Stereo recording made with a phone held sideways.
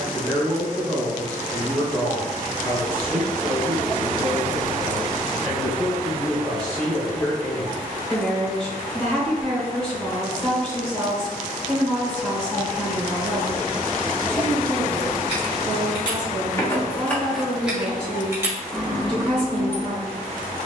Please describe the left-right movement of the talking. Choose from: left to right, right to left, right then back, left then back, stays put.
stays put.